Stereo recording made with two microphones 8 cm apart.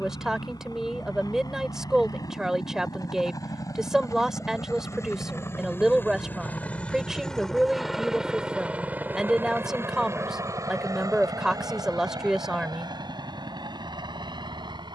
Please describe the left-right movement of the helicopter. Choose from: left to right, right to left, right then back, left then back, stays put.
left to right.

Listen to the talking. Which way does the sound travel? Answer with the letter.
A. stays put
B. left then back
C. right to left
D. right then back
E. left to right
A.